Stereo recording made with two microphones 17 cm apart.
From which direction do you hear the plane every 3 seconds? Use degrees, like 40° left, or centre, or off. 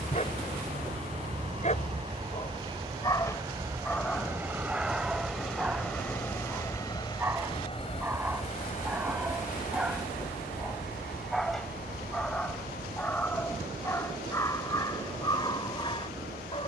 40° right, 10° right, 30° left, 60° left, 70° left, 80° left.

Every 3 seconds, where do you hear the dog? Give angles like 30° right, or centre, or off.
40° left, centre, 10° right, centre, 10° left, 30° left.